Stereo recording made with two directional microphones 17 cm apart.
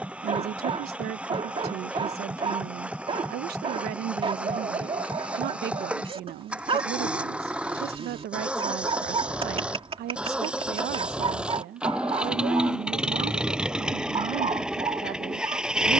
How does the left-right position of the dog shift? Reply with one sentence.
In this clip you hear the dog stay put.